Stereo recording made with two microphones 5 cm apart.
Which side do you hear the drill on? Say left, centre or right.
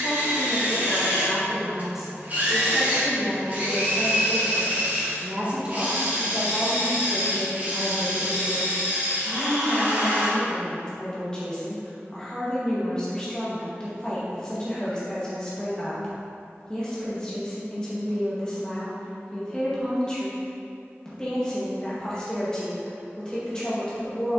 right.